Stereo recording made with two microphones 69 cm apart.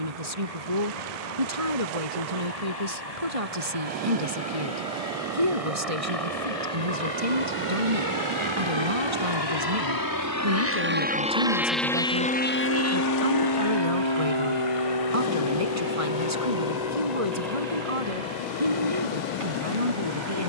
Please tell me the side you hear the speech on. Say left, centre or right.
right.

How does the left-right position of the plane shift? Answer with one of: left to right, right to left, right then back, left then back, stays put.
right to left.